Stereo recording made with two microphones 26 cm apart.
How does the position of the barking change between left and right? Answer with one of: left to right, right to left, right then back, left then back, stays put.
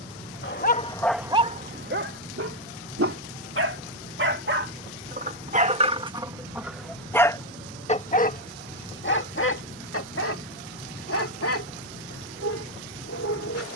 right then back.